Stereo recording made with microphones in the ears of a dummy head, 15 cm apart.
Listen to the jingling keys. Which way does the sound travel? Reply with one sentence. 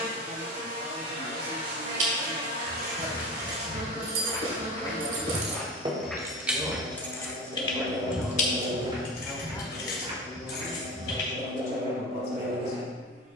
In this clip you hear the jingling keys move to the left.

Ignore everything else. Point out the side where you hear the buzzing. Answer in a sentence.
You can hear the buzzing on the right.